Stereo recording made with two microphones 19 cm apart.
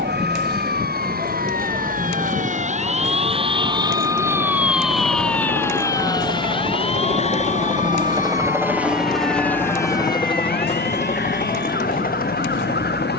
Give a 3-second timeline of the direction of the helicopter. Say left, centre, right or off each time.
right, right, right, left, left.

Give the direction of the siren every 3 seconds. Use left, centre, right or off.
right, centre, left, left, left.